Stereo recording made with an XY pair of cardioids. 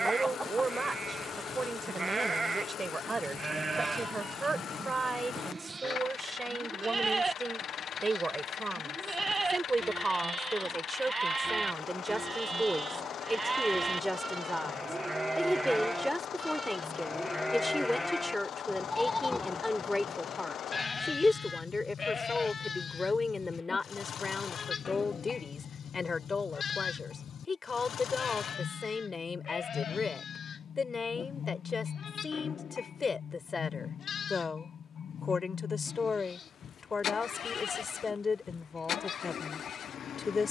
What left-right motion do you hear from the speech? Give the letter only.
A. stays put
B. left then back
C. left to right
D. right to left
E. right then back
D.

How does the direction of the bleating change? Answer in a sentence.
You can hear the bleating travel towards the left.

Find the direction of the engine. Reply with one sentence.
In this clip you hear the engine on the left.